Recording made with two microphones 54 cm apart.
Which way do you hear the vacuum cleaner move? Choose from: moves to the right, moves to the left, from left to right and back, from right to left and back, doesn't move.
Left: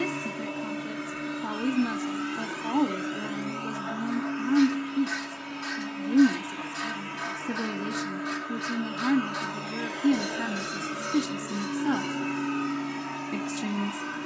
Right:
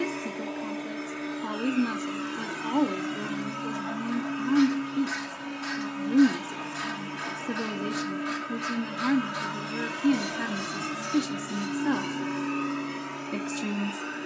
from left to right and back.